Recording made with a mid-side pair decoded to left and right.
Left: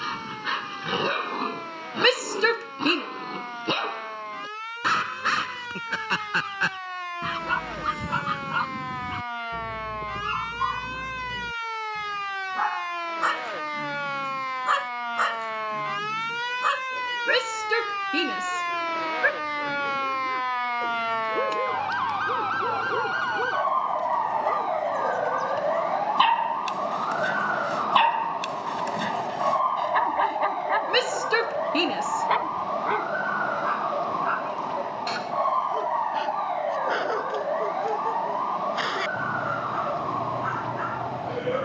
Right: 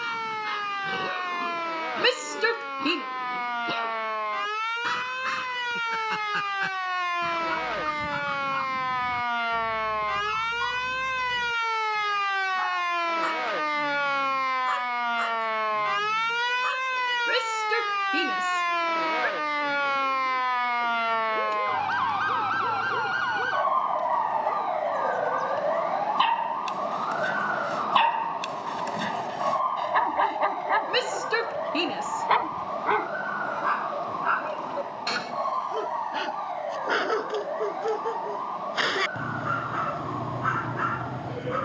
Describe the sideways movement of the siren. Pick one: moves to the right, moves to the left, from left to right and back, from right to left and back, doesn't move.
moves to the left.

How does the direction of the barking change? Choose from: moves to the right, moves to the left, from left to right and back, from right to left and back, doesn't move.
moves to the right.